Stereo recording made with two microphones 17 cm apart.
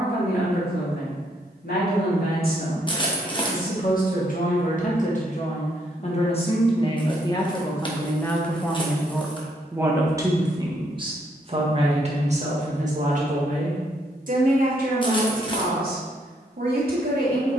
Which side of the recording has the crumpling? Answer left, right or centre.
left.